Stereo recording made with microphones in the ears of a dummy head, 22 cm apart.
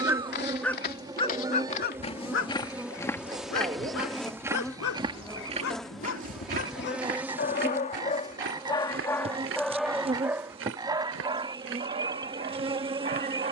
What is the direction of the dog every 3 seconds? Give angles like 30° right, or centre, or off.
30° left, 60° left, 40° left, 10° right, 30° right.